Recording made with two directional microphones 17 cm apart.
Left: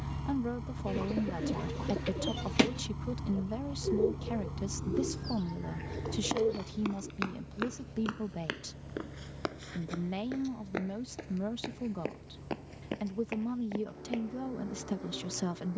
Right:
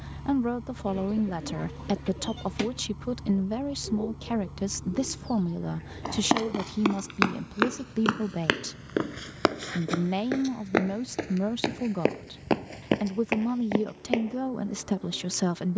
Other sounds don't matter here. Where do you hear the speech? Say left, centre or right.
right.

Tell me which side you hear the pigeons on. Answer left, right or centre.
left.